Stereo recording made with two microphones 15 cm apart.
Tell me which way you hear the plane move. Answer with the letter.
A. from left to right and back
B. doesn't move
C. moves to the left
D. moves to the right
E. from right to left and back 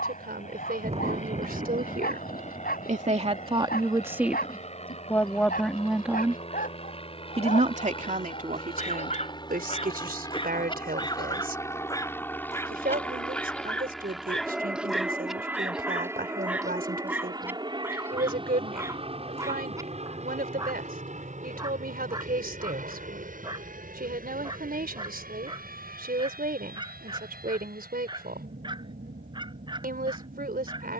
D.